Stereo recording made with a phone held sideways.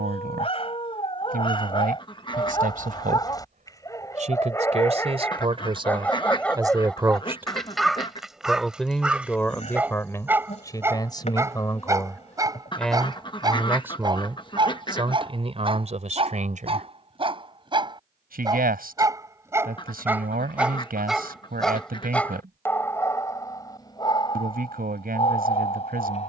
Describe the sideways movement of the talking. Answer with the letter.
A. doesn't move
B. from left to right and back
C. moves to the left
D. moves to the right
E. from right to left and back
E.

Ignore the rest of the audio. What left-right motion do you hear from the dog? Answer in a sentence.
In this clip you hear the dog move from left to right and back again.